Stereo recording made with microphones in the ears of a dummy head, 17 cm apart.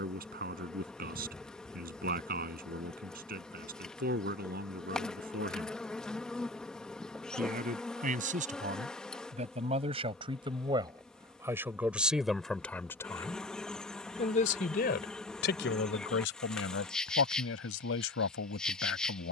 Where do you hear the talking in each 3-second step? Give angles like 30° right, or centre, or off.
50° right, 50° right, 40° right, 20° right, 20° left, 70° left, 70° left.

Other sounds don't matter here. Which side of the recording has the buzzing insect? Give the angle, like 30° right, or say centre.
centre.